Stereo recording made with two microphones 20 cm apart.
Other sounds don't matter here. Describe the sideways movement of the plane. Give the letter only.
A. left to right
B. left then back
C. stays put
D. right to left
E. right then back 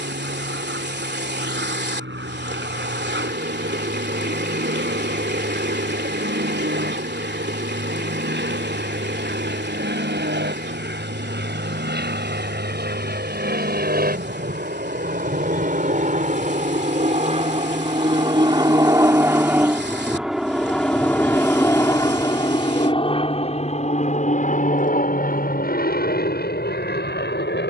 D.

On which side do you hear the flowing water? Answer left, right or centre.
right.